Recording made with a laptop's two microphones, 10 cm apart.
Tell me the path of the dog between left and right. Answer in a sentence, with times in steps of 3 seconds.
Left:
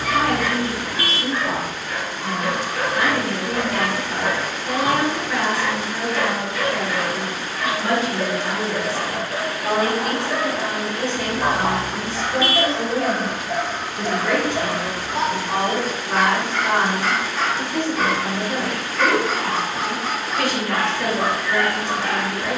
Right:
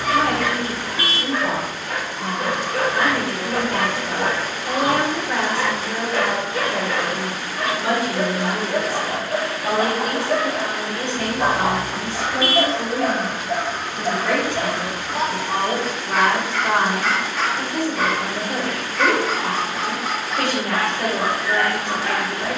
You can hear the dog on the right from 0 s, in the centre from 12 s and on the left from 15 s.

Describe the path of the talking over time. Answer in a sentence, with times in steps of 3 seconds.
You can hear the talking on the right from 0 s, in the centre from 9 s, on the left from 12 s, in the centre from 15 s and on the right from 18 s.